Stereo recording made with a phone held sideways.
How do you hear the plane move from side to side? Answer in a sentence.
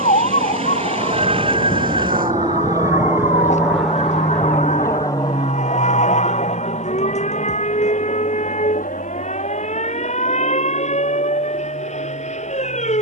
You can hear the plane move to the left.